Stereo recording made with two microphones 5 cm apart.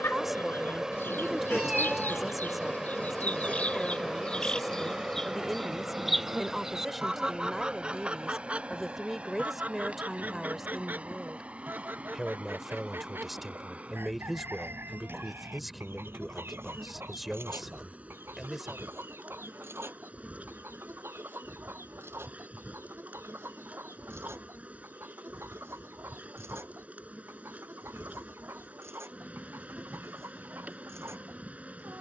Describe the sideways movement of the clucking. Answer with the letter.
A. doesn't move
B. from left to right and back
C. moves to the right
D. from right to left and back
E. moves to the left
C.